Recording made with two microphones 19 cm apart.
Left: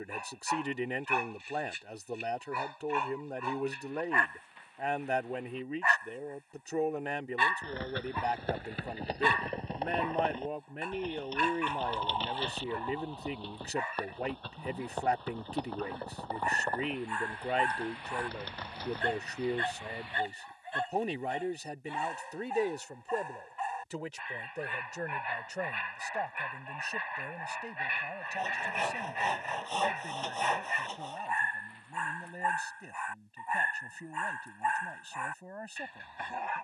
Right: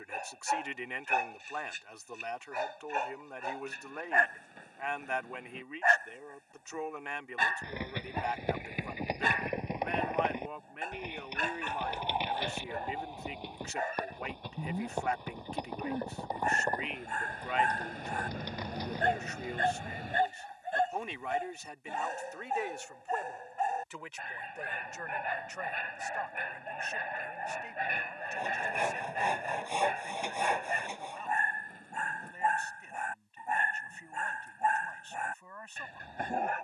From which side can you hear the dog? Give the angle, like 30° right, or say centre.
50° right.